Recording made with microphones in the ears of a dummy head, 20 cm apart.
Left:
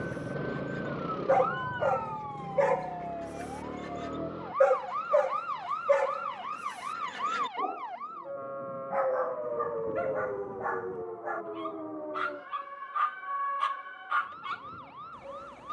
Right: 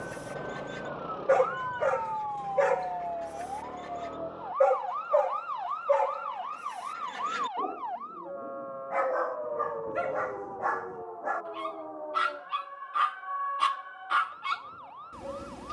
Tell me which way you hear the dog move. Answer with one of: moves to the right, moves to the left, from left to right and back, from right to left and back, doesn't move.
from right to left and back.